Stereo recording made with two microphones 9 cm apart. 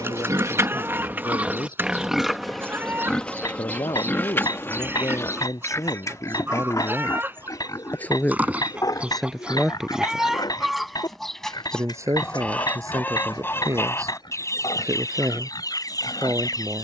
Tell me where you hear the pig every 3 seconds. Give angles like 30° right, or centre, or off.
20° right, 20° left, 40° left, 50° left, 60° left, 60° left.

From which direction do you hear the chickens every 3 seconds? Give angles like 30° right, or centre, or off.
20° right, 20° right, 20° right, centre, 30° left, 40° left.